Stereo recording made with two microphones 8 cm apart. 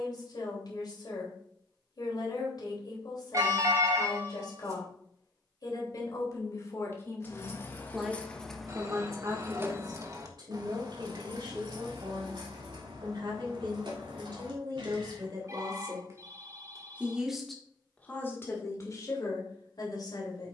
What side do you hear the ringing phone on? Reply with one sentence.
In this clip you hear the ringing phone on the right.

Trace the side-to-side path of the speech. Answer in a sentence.
You can hear the speech move from left to right and back again.